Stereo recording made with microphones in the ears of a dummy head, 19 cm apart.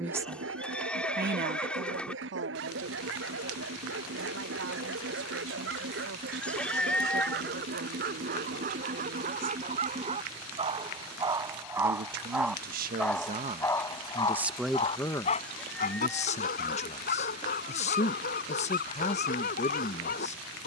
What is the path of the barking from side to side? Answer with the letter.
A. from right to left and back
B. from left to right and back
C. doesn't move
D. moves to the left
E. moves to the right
D.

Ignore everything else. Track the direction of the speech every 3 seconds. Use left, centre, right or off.
right, right, right, right, right, left, left.